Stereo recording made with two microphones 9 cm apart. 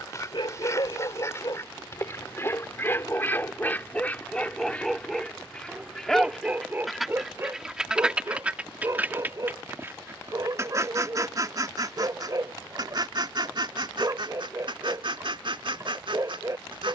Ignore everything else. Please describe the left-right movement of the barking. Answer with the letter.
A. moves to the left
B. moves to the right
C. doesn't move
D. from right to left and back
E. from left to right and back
B.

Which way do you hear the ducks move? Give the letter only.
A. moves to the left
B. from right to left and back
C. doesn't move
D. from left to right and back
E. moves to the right
E.